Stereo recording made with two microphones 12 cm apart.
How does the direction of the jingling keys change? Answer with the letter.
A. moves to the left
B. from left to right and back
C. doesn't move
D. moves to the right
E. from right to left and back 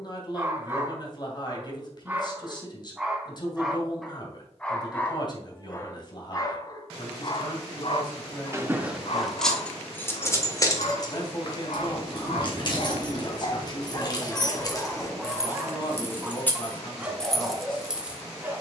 E.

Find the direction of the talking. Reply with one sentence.
In this clip you hear the talking on the left.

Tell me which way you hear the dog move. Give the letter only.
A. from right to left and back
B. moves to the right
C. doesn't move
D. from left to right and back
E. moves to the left
A.